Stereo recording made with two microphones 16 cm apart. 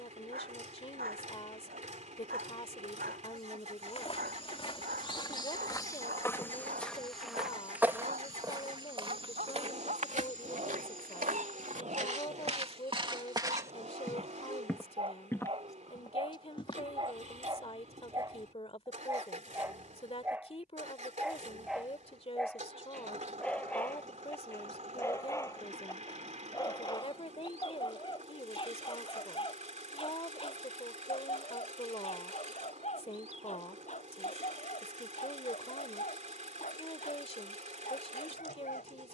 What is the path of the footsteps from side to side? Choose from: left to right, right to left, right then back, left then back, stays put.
right then back.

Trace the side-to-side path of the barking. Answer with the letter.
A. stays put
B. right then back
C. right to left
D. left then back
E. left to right
C.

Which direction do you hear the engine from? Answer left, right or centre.
right.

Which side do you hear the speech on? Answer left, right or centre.
left.